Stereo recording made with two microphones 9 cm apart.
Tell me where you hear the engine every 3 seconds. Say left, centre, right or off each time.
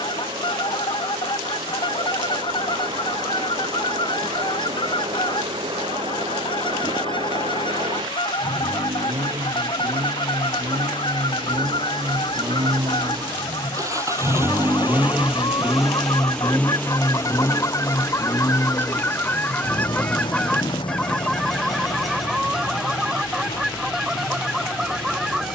right, right, right, right, right, centre, left, left, left.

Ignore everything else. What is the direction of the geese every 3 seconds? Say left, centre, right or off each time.
left, left, left, left, left, left, left, centre, centre.